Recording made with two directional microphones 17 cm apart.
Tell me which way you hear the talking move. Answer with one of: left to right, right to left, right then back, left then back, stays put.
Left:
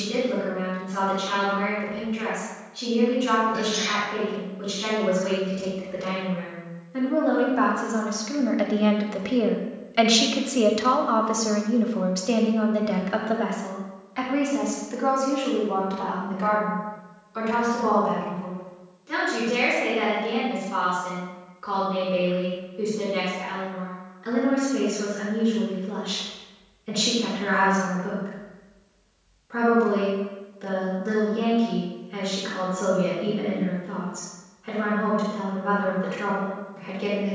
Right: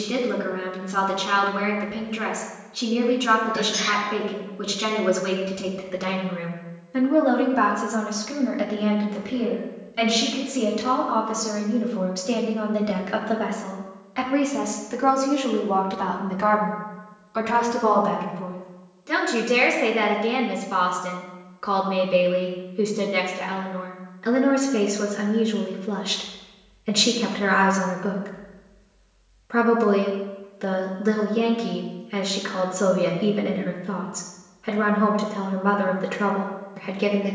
left then back.